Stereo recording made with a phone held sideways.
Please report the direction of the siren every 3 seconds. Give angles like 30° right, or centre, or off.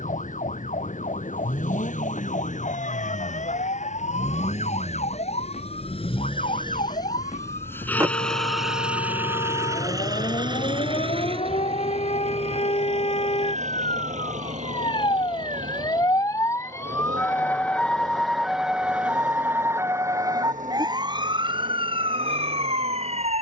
70° left, 70° left, 60° left, 60° left, 50° left, 20° left, 10° right, 40° right.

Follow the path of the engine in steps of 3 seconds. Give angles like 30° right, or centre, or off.
70° left, 60° left, 20° left, 30° right, 60° right, 70° right, 70° right, 80° right.